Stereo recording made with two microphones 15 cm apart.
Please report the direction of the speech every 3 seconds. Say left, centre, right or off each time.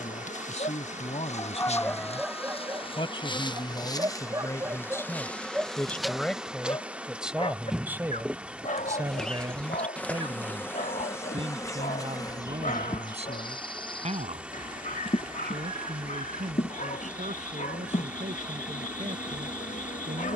left, left, centre, right, right, right, right.